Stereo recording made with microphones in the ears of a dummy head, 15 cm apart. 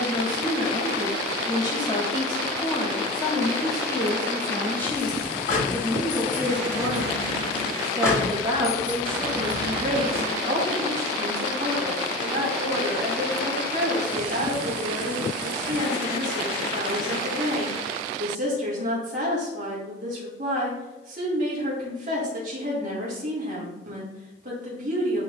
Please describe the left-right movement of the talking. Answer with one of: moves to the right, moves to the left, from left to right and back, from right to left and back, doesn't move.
moves to the right.